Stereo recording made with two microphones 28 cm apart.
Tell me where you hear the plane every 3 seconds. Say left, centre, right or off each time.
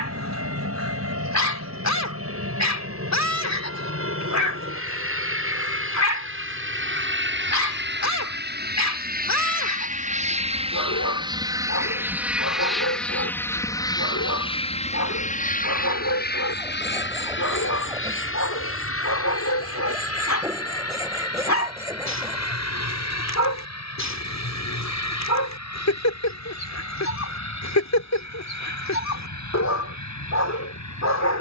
right, right, right, right, centre, left, left, left, left, left, left.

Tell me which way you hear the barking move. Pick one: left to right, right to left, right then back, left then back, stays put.
stays put.